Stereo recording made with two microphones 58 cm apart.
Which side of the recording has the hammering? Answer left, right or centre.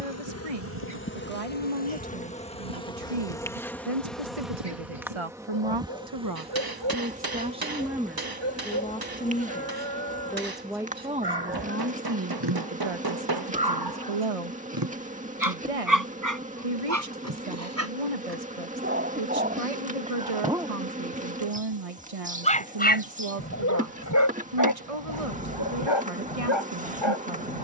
right.